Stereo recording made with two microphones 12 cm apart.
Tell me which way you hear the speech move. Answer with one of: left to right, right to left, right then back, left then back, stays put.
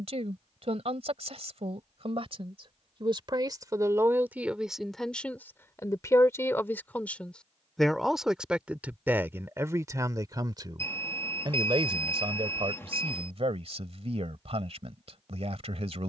left then back.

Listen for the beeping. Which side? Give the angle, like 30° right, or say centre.
20° left.